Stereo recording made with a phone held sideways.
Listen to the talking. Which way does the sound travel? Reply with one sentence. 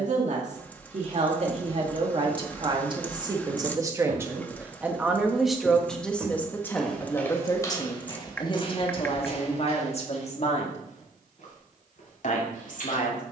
In this clip you hear the talking travel towards the left.